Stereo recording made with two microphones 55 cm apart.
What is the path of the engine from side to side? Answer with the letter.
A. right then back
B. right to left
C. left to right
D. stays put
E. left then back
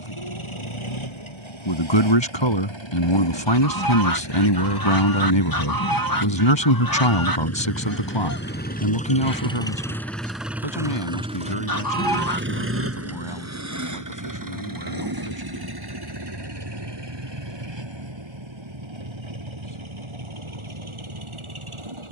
C.